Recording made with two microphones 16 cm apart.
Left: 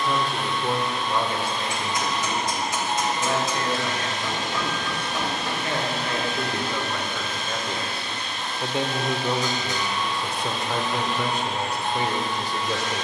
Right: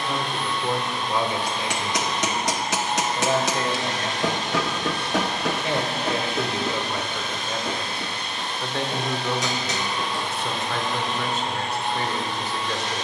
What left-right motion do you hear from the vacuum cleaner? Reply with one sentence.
You can hear the vacuum cleaner stay in one place.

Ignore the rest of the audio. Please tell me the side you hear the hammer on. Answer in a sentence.
In this clip you hear the hammer on the right.